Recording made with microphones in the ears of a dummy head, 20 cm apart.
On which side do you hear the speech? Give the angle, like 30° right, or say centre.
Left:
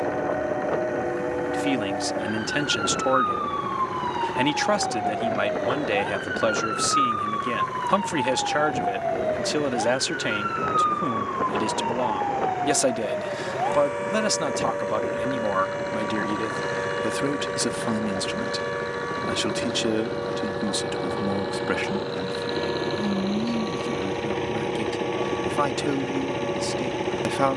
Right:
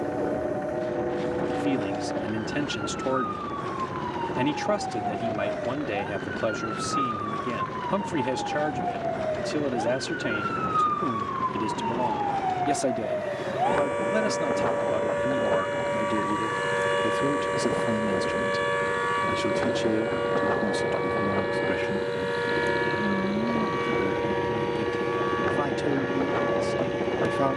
40° left.